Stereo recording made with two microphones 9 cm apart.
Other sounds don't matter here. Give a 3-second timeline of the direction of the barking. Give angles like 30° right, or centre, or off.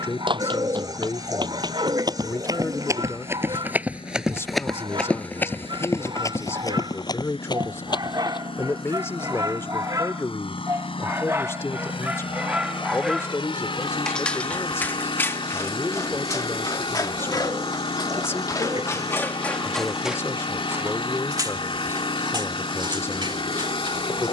60° right, 60° right, 50° right, 30° right, centre, 40° left, 20° left, 50° right.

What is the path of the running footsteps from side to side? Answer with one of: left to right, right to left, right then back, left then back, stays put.
right to left.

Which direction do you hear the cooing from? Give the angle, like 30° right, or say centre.
40° right.